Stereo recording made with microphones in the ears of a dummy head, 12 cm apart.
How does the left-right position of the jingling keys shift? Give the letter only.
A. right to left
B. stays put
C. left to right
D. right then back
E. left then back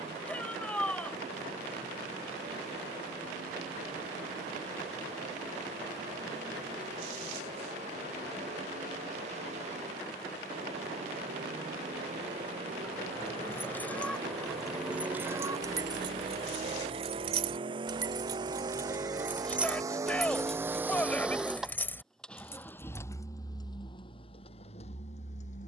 D.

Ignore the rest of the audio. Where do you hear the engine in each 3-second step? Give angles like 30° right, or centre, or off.
60° right, 60° right, 60° right, 60° right, 50° right, 40° right, 30° right, 10° left, 50° left.